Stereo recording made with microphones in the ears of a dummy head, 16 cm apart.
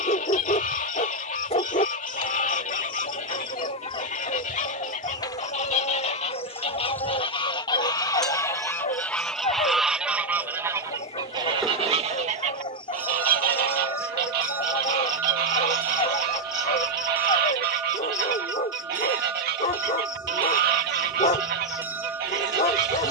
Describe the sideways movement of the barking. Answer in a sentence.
You can hear the barking stay put.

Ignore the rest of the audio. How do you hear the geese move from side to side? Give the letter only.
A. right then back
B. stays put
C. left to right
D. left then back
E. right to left
C.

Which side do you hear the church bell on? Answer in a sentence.
You can hear the church bell in the centre.